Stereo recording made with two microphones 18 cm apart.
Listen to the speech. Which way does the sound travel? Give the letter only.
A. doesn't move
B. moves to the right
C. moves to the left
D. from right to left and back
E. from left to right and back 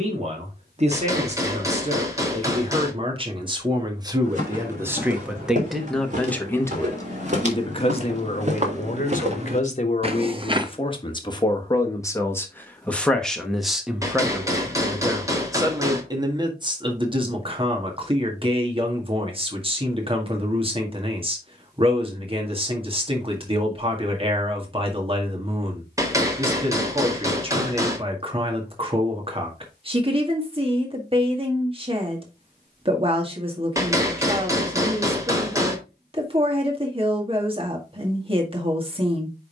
D.